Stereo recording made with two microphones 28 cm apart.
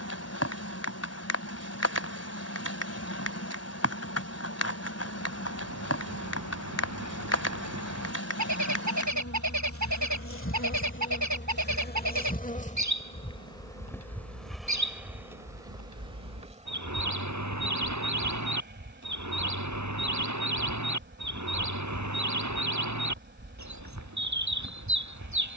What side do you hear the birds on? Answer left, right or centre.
right.